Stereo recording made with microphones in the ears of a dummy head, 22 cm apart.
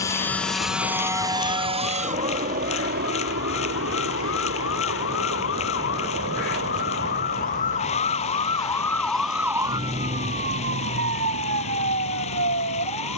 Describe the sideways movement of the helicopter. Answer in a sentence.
You can hear the helicopter go from the left side to the right.